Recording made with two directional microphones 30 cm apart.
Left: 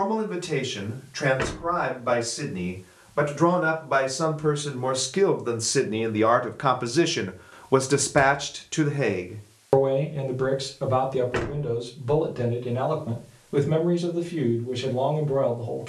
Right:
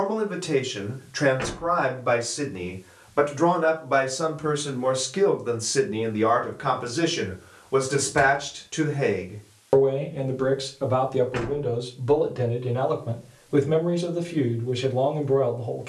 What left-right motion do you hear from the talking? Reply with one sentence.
In this clip you hear the talking go left and come back.